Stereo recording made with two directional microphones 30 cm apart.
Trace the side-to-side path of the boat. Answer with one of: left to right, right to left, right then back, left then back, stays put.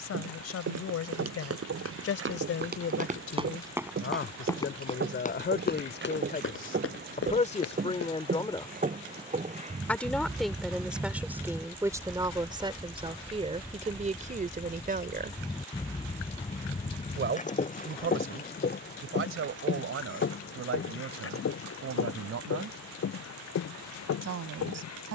right to left.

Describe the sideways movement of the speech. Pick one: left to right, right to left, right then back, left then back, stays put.
left to right.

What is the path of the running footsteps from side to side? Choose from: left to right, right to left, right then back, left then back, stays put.
right to left.